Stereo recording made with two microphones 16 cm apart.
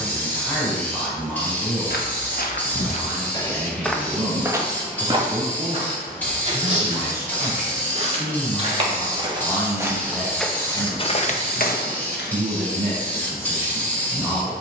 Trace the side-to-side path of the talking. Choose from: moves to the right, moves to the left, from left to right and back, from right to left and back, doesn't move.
doesn't move.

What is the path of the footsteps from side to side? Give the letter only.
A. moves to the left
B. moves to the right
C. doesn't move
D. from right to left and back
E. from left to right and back
E.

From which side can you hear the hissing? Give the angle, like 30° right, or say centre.
10° left.